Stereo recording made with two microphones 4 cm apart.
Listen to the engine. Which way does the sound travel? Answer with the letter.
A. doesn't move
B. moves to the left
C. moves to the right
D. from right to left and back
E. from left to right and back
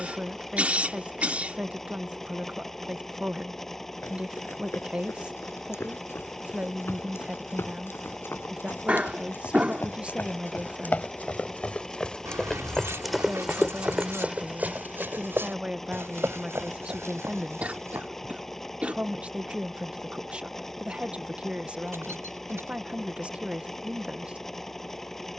A.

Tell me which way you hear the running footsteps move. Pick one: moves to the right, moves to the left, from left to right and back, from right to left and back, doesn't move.
moves to the right.